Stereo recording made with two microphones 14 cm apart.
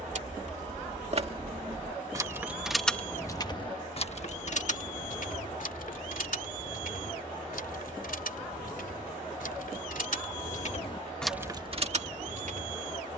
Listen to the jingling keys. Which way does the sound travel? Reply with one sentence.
You can hear the jingling keys move from right to left and back again.